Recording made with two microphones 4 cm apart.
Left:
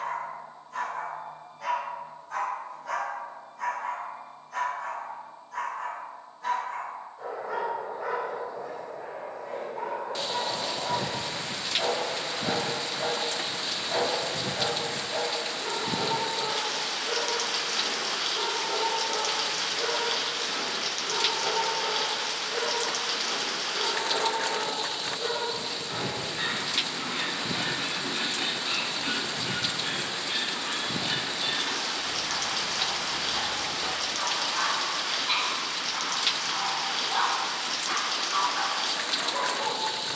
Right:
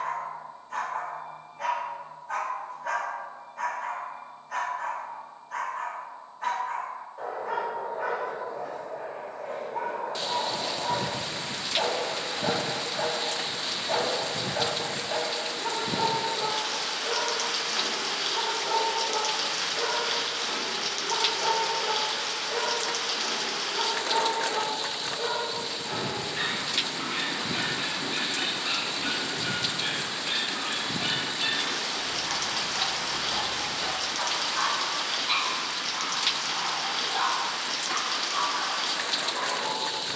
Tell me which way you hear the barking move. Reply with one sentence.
You can hear the barking go from the right side to the left.